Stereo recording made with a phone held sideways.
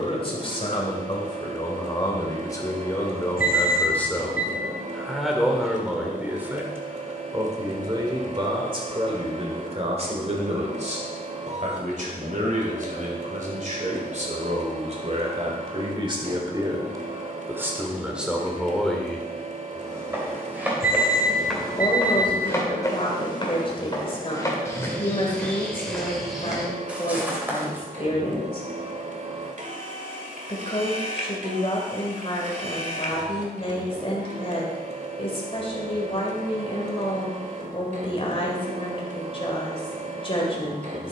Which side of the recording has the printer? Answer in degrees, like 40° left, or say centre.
50° right.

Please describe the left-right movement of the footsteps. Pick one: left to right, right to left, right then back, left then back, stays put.
left then back.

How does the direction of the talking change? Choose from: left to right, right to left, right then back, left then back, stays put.
right then back.